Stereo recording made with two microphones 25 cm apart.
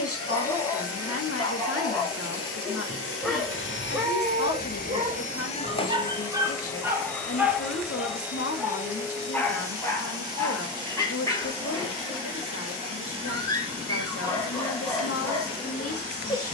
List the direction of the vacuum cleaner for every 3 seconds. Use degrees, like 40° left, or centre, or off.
70° left, 40° left, centre, 20° right, 20° right, 20° right.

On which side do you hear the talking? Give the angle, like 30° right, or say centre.
70° left.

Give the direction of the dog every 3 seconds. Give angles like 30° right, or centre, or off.
10° left, 10° right, 10° right, 10° left, 20° left, 20° left.